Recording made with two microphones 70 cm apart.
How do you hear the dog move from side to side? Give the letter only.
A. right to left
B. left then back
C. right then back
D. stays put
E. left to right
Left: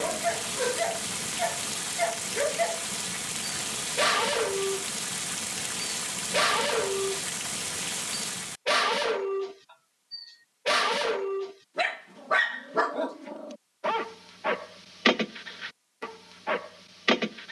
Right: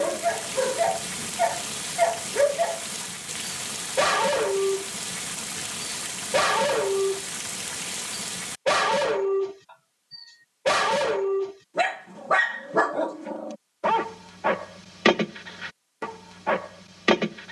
D.